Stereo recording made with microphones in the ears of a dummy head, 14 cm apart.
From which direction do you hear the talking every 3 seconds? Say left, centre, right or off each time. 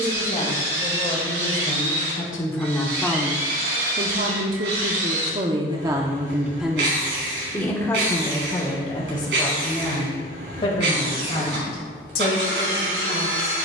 left, right, centre, left, left.